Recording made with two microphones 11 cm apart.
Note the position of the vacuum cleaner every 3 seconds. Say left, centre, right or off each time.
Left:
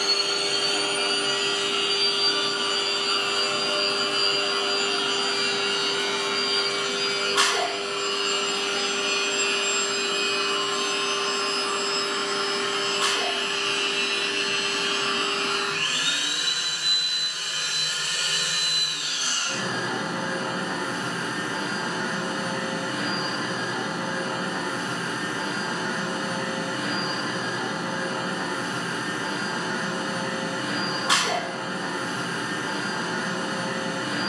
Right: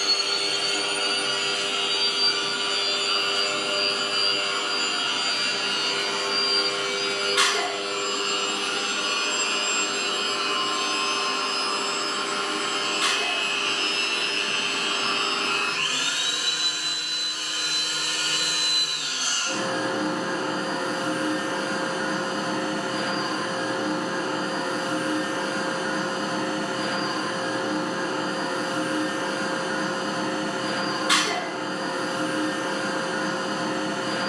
left, left, centre, right, right, right, right, right, right, right, right, right.